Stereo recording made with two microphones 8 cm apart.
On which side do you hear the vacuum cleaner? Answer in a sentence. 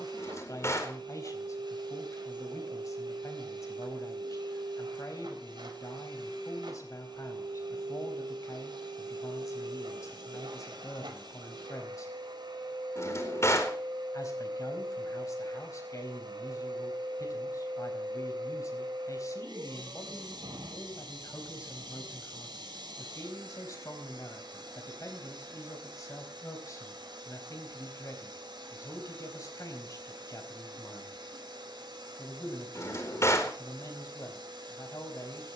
You can hear the vacuum cleaner on the right.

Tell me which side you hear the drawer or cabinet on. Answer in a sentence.
You can hear the drawer or cabinet on the left.